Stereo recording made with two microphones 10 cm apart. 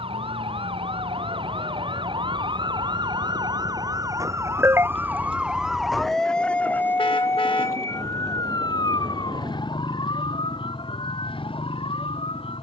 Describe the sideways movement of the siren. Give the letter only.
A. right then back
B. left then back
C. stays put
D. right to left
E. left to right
D.